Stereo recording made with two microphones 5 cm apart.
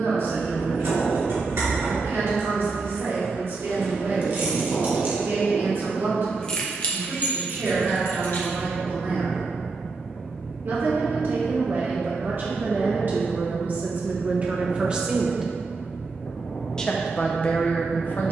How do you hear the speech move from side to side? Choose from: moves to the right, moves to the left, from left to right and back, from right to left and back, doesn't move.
moves to the left.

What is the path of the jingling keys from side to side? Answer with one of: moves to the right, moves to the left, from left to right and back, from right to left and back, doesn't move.
moves to the left.